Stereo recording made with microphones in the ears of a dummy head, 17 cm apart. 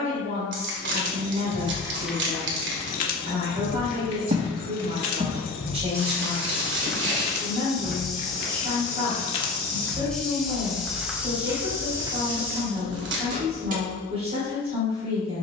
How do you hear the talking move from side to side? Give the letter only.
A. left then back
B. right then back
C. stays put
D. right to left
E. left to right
C.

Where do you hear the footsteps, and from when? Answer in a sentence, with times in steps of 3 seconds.
You can hear the footsteps not at all from 0 s, on the right from 3 s, in the centre from 6 s and on the right from 12 s.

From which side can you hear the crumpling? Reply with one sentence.
In this clip you hear the crumpling on the right.